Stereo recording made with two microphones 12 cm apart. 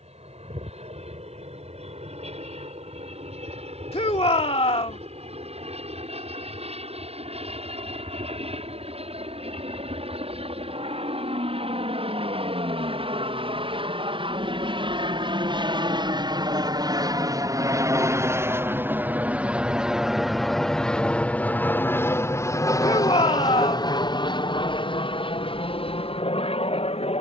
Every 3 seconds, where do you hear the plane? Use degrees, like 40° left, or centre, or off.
70° right, 70° right, 70° right, 60° right, 60° right, 40° right, 10° right, 20° left, 50° left.